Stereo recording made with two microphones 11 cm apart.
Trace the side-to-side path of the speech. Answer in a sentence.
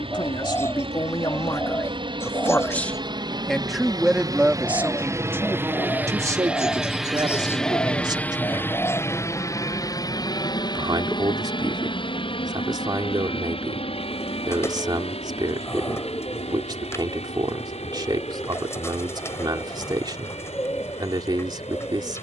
You can hear the speech move from left to right.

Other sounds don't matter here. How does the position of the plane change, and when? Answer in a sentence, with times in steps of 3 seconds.
You can hear the plane on the right from 0 s, in the centre from 6 s and on the left from 9 s.